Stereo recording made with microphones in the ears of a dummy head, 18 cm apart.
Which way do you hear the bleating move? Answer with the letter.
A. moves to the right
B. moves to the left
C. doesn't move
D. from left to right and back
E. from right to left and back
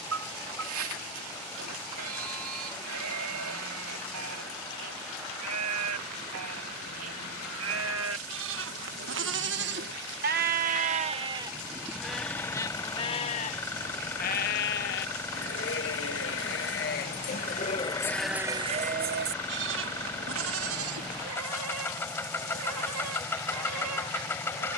E.